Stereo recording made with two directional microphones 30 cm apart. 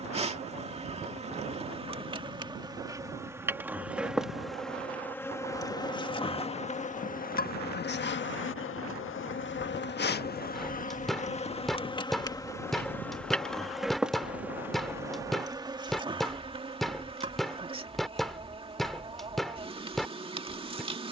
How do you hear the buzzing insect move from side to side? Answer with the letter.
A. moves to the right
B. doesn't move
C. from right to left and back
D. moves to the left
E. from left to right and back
C.